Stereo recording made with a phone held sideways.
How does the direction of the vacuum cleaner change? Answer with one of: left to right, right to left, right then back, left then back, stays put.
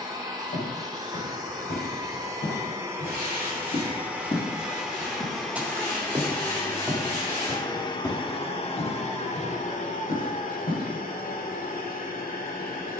right to left.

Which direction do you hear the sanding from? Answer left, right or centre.
left.